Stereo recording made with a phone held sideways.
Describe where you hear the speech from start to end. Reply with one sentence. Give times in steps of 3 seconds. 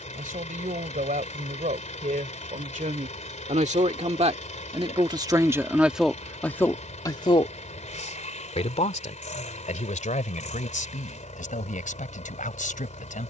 You can hear the speech on the right from 0 s and on the left from 6 s.